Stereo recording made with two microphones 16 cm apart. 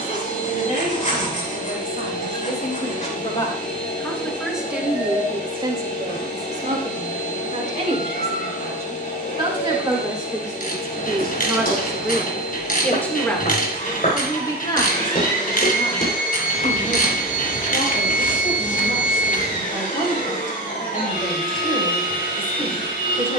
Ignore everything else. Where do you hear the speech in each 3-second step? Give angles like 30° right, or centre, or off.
60° left, centre, 40° right, 20° right, 20° left, 50° left, 60° left, 60° left.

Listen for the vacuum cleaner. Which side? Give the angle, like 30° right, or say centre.
60° left.